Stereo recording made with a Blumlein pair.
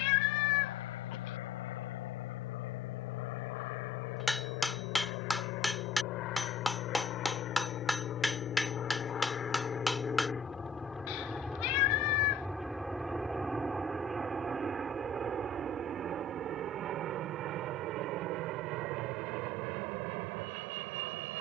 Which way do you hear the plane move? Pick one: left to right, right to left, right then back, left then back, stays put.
left to right.